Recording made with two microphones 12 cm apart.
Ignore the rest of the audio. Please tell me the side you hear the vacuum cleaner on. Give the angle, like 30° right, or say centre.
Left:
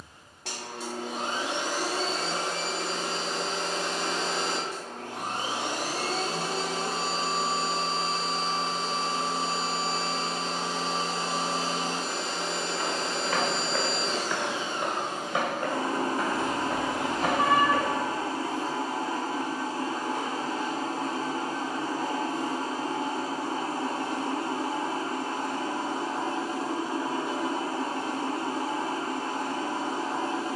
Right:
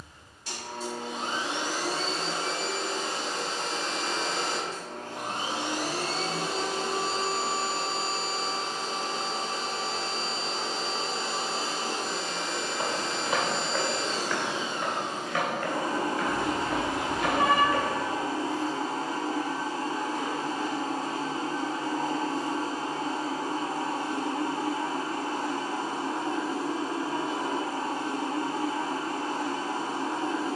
70° left.